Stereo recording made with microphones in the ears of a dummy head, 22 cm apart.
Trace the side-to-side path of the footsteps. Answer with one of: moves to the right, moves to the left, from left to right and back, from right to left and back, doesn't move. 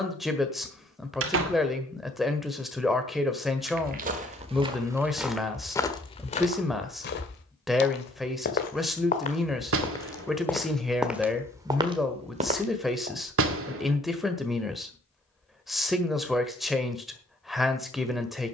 from right to left and back.